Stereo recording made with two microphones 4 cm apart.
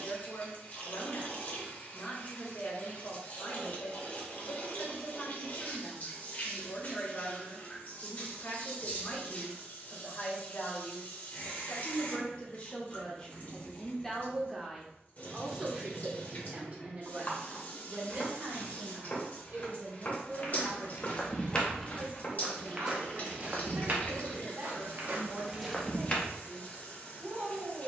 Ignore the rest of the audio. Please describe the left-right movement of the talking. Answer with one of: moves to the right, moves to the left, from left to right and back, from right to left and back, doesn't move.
moves to the right.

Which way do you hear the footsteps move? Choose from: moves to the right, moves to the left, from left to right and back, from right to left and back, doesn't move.
from left to right and back.